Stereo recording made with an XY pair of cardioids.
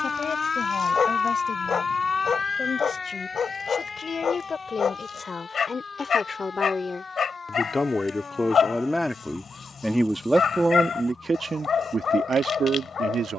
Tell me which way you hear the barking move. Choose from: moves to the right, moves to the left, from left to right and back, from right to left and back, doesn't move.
doesn't move.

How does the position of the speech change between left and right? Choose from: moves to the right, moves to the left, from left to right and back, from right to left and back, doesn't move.
moves to the right.